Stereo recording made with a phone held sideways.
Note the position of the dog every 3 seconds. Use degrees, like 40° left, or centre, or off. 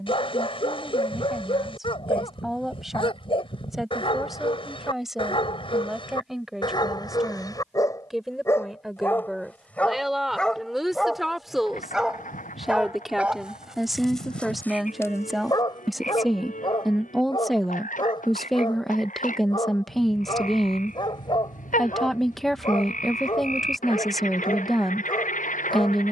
40° left, 40° left, 30° left, 10° left, centre, 30° left, 40° left, 40° left, 40° left.